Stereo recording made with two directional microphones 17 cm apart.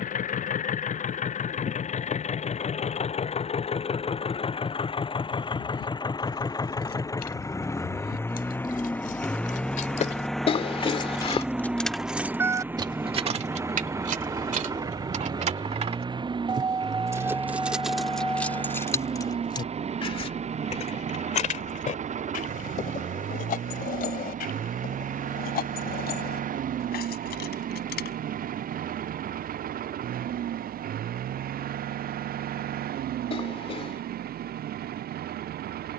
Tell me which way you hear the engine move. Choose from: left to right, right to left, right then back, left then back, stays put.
left to right.